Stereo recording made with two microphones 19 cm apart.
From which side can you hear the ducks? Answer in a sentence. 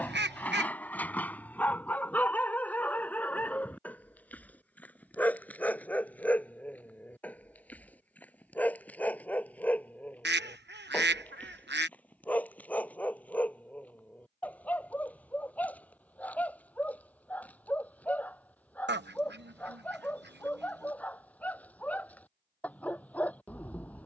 In this clip you hear the ducks on the right.